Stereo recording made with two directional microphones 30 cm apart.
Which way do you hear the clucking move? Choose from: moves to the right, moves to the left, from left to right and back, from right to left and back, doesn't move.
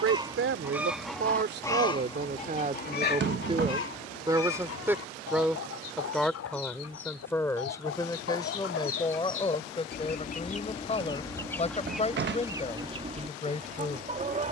from right to left and back.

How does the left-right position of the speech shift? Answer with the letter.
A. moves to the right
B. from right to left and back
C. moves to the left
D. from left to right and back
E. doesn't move
C.